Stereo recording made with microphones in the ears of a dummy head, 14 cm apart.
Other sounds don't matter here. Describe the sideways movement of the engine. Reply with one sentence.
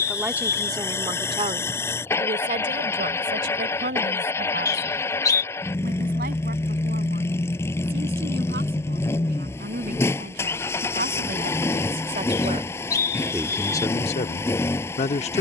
In this clip you hear the engine stay in one place.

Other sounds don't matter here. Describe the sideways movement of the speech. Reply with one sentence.
You can hear the speech go right and come back.